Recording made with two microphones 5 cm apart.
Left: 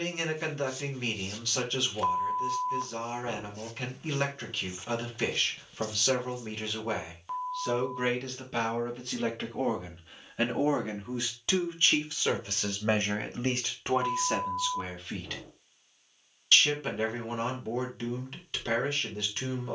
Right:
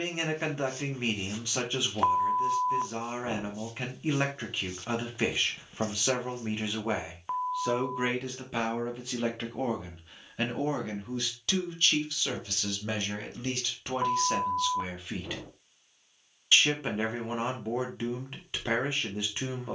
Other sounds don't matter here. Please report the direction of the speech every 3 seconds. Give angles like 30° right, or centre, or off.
20° right, 20° right, 10° right, 10° left, 20° left, 20° right, 20° right.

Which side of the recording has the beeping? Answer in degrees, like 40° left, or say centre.
30° right.